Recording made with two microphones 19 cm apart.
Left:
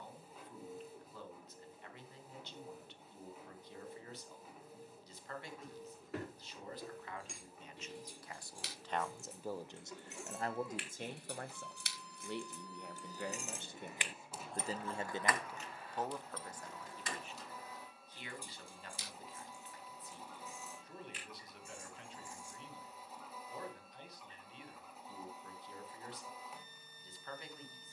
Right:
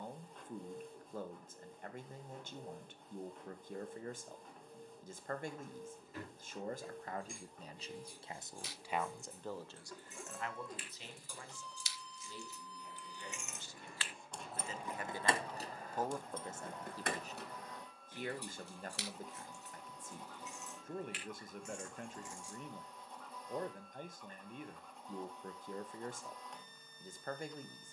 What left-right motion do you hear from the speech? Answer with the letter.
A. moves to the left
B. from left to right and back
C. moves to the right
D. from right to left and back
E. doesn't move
D.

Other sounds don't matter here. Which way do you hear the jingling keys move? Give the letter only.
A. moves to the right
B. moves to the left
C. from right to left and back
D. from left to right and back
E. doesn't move
A.